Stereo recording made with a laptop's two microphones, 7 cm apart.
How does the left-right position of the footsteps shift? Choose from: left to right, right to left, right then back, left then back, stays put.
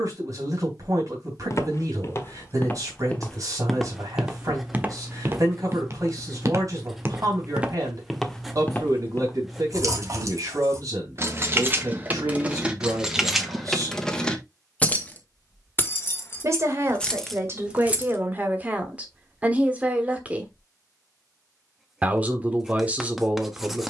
right then back.